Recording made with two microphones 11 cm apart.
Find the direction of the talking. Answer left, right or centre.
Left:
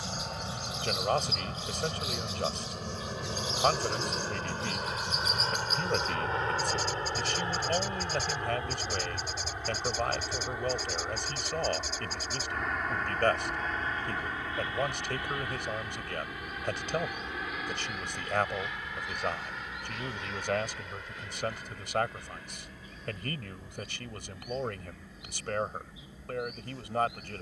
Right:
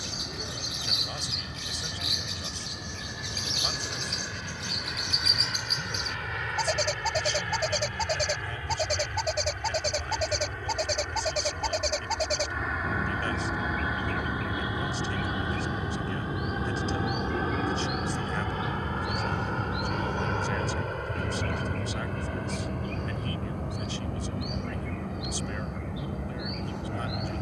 left.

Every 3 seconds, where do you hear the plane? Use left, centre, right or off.
left, left, left, centre, centre, right, right, right, right.